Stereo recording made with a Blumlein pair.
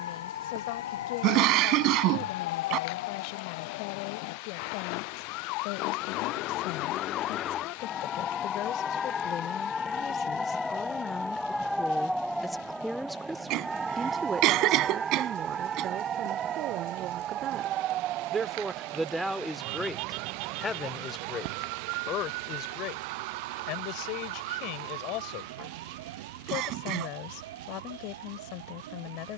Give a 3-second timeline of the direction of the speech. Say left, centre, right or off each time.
left, left, left, left, centre, right, centre, left, left, left.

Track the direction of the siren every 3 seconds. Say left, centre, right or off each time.
left, left, left, centre, centre, right, right, right, right, right.